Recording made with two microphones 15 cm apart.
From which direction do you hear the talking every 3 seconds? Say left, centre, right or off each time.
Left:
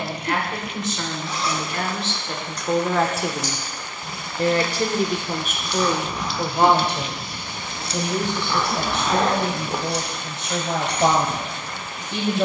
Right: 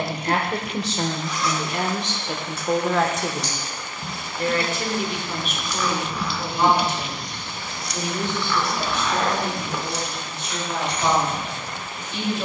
right, left, left, left.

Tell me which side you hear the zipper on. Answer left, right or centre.
left.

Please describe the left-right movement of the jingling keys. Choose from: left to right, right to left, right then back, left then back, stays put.
right to left.